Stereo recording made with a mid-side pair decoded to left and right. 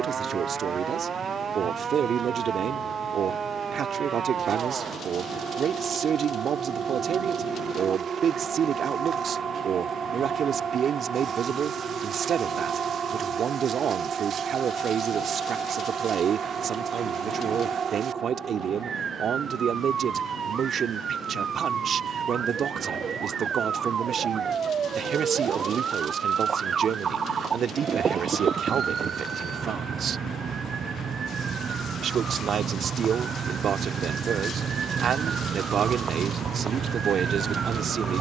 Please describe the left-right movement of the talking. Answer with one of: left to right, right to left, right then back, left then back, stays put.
stays put.